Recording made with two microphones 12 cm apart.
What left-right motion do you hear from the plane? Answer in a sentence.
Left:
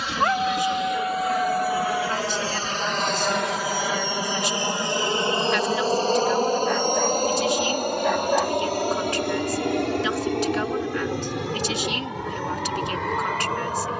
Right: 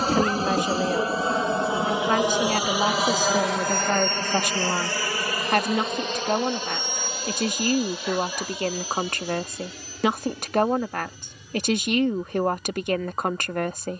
In this clip you hear the plane move from right to left.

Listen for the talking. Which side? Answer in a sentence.
In this clip you hear the talking on the right.